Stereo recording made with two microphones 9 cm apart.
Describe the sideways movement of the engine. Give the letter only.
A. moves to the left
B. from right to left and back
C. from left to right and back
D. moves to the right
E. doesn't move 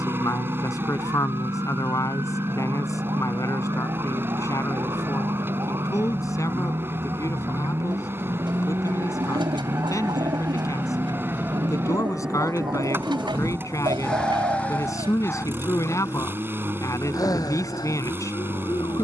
E.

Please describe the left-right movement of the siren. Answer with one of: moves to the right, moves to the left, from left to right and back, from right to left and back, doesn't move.
moves to the left.